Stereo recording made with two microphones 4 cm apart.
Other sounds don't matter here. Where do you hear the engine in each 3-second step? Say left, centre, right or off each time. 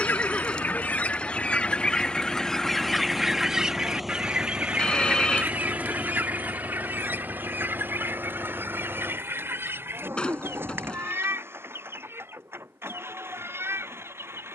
left, centre, right, right, right.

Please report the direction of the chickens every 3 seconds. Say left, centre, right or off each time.
left, right, right, right, right.